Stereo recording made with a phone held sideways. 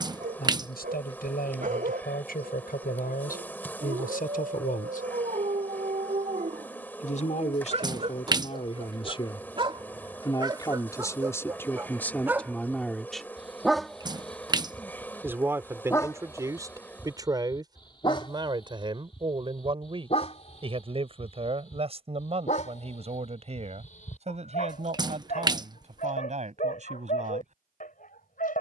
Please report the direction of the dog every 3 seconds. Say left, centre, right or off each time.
right, right, right, right, centre, left, left, left, left, left.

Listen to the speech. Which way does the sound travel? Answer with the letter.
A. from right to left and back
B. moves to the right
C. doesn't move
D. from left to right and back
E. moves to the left
B.